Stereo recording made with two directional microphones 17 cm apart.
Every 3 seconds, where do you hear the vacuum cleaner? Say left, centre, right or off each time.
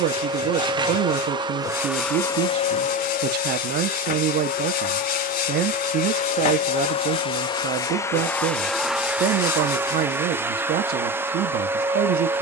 centre, left, left, centre.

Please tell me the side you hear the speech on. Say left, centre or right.
right.